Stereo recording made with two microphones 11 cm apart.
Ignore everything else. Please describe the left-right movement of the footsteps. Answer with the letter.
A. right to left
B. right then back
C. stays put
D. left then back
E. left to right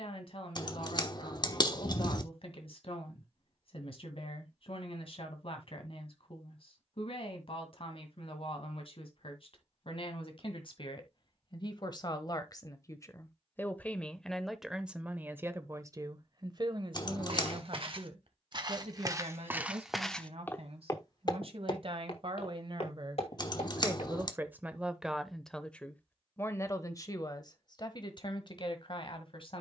A.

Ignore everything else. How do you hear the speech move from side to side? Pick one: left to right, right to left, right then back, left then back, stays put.
right then back.